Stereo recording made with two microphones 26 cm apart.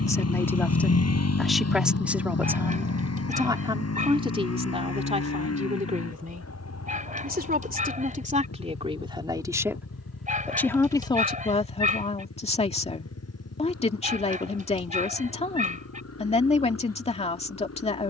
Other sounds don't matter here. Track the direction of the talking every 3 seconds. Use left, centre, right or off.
centre, right, right, centre, left, left.